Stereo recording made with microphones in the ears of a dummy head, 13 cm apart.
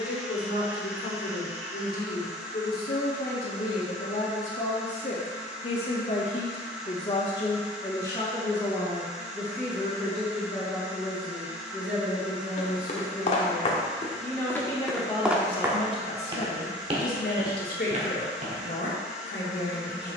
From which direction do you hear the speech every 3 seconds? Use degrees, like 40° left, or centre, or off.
70° left, 50° left, 30° left, centre, centre, 50° left, 70° left.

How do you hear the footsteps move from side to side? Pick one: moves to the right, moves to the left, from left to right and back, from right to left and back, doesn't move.
moves to the right.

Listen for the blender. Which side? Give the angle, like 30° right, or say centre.
10° right.